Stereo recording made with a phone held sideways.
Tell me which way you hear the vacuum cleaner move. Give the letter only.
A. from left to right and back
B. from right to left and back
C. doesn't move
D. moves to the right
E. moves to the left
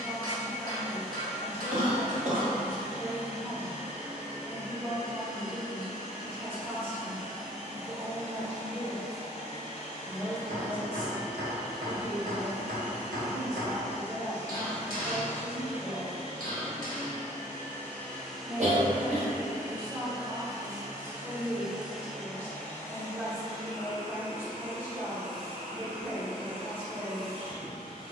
A.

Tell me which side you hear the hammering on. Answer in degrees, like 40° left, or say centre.
70° right.